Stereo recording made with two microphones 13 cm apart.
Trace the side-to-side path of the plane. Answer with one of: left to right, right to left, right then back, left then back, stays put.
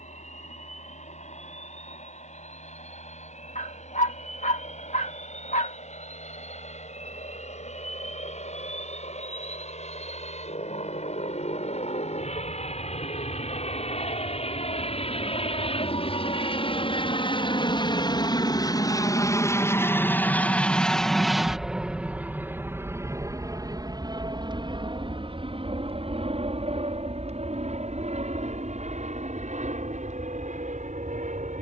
left to right.